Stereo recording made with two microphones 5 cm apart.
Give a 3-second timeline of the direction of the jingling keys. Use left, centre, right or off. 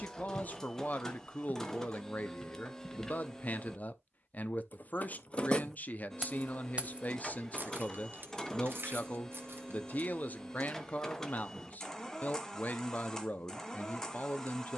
off, left, right, right, off.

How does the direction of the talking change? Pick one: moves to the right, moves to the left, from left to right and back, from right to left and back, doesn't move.
doesn't move.